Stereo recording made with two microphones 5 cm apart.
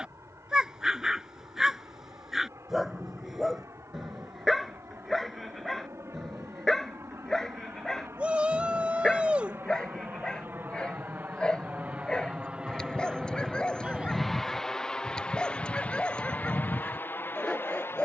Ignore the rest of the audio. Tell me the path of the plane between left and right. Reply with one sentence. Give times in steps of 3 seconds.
You can hear the plane on the right from 0 s, in the centre from 12 s and on the left from 15 s.